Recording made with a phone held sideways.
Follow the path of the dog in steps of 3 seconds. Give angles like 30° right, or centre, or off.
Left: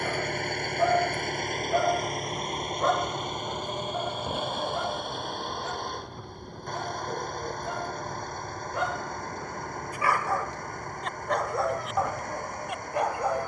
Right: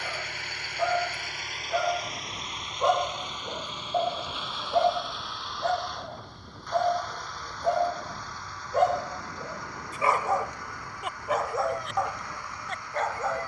10° left, 50° right, 60° right, 20° right, 10° left.